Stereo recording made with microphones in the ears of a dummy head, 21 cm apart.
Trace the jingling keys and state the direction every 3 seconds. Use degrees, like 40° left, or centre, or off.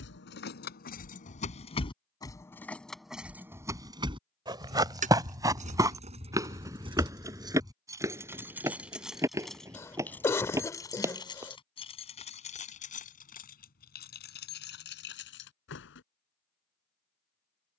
30° left, 20° right, 20° right, 10° left, 40° left, 50° left.